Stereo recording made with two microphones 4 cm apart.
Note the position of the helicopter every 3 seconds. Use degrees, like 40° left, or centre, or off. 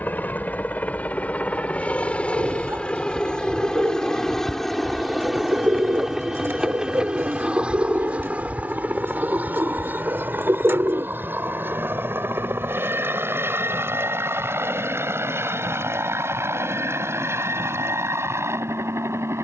30° left, 10° left, 20° right, 40° right, 60° right, 60° right, 70° right.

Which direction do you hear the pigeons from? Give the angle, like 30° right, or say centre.
60° right.